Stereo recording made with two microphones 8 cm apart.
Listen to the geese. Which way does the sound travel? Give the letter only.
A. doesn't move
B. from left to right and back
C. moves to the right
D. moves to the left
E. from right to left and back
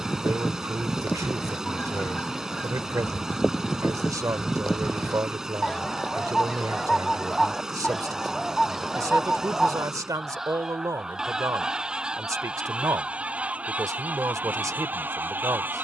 C.